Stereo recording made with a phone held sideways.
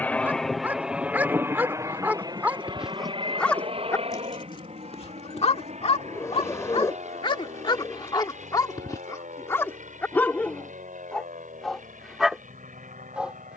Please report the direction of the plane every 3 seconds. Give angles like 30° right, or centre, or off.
10° right, 40° right, 50° right, 60° right, 60° right.